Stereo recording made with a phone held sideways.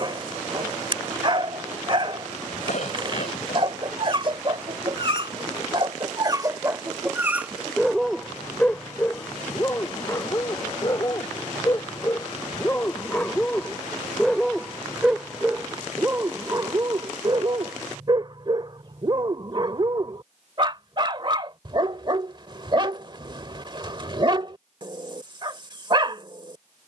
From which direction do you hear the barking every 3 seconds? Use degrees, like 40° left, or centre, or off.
40° right, 40° right, 10° right, 20° left, 10° left, 20° right, 40° right, 40° right, 40° right.